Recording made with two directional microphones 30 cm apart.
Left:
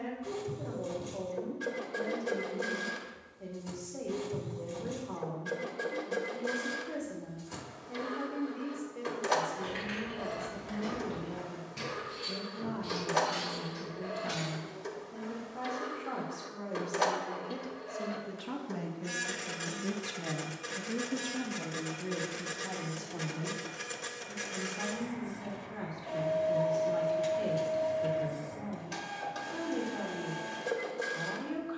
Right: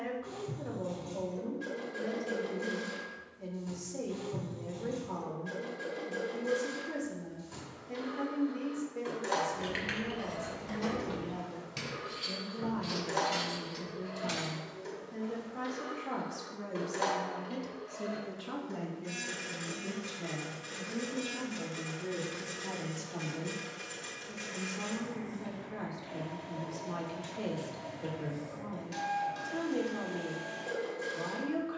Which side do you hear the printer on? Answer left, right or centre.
left.